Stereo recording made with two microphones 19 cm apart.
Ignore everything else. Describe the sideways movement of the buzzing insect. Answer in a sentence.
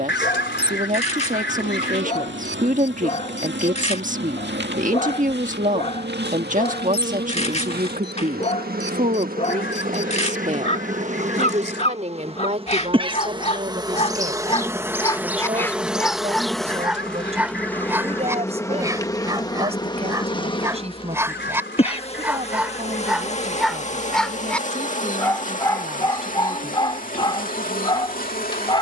In this clip you hear the buzzing insect travel towards the left.